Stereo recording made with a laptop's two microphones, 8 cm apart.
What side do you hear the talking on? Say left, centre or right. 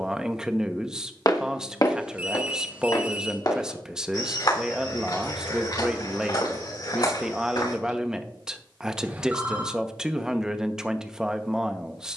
centre.